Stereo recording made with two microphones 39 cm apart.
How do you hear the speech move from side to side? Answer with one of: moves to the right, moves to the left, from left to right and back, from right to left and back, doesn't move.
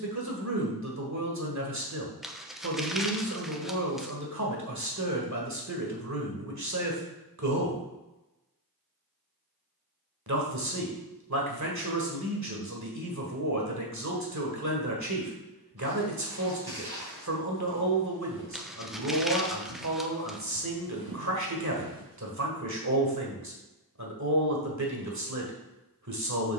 doesn't move.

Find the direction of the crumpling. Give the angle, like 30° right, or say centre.
centre.